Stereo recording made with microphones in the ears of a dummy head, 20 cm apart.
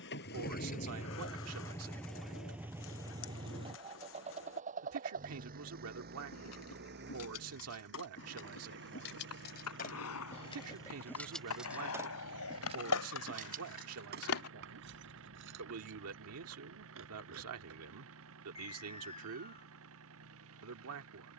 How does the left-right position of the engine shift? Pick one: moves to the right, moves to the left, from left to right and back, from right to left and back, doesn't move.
moves to the right.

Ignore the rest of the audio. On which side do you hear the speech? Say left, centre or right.
right.